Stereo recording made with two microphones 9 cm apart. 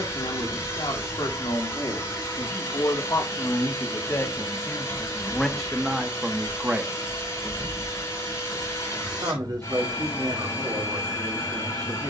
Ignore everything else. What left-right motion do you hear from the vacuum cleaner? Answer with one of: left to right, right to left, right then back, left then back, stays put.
stays put.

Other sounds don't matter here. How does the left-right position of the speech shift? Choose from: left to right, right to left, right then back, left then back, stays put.
left to right.